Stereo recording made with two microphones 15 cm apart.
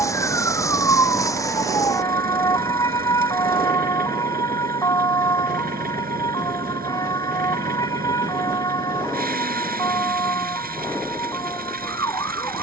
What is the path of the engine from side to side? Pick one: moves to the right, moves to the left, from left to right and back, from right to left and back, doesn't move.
doesn't move.